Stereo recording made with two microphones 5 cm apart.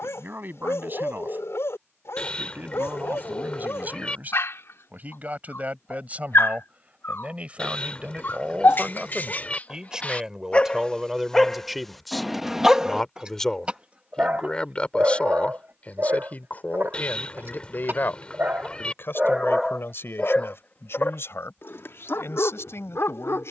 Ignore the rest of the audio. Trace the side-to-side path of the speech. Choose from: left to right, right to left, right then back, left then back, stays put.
right to left.